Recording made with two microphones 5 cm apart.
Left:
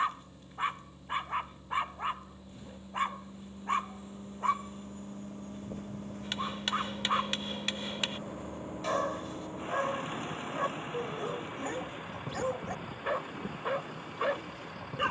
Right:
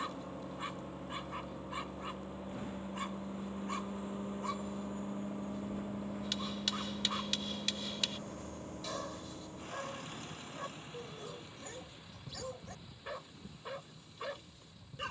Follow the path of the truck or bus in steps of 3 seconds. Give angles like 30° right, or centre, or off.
50° right, 30° right, centre, 40° left, 60° left.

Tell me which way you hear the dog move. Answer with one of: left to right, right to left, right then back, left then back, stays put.
stays put.